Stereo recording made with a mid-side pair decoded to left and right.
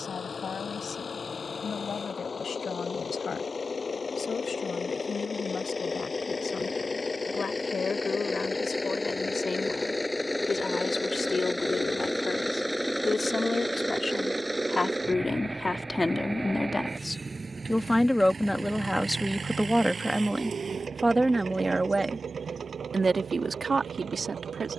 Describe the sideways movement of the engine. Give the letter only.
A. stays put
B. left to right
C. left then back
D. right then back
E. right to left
B.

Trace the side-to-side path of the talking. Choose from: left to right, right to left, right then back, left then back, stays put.
left to right.